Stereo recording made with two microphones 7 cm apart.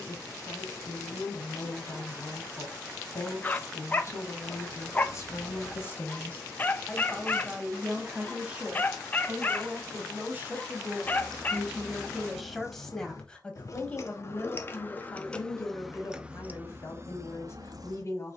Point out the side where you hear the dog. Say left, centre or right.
left.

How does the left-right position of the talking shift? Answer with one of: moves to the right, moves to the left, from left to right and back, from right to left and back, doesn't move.
from left to right and back.